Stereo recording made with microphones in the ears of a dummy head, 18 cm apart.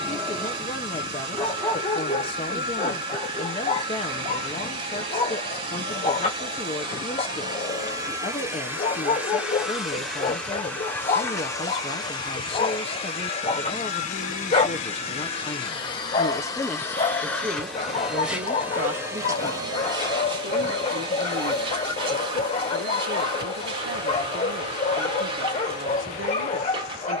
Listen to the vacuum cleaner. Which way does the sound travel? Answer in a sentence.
You can hear the vacuum cleaner move from right to left and back again.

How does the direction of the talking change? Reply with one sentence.
You can hear the talking go from the left side to the right.